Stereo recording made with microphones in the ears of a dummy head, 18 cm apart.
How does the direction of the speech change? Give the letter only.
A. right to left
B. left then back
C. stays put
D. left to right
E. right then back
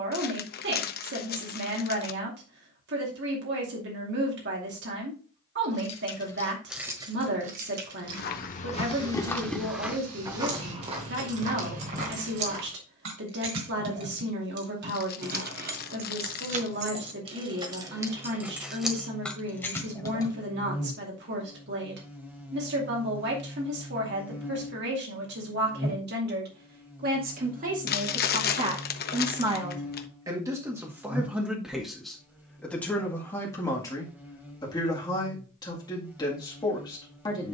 A.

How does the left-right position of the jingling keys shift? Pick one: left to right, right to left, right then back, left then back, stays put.
right then back.